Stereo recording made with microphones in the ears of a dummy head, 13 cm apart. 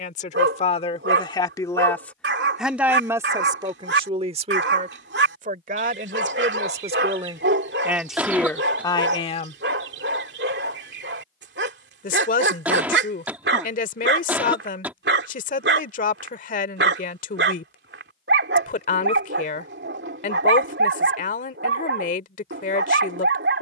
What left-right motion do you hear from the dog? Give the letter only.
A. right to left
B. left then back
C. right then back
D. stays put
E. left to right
D.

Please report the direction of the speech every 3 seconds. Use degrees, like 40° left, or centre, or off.
30° left, 40° right, 20° right, 40° left, 60° left, 60° left, 60° left, 60° left.